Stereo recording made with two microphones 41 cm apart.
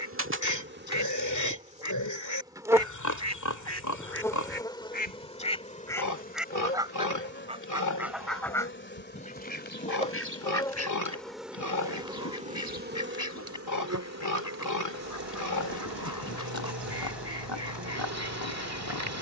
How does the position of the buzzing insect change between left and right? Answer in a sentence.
In this clip you hear the buzzing insect move from right to left and back again.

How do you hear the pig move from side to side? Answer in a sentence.
In this clip you hear the pig stay put.